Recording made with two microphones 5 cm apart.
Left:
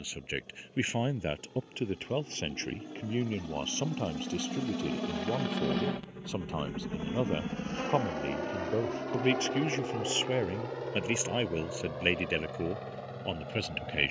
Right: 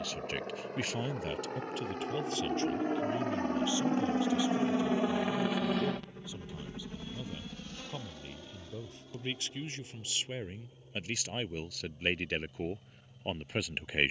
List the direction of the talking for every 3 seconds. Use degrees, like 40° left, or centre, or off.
30° left, 50° left, 50° left, 30° left, centre.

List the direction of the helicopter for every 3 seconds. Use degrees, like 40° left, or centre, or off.
60° right, 30° right, 30° left, 60° left, 70° left.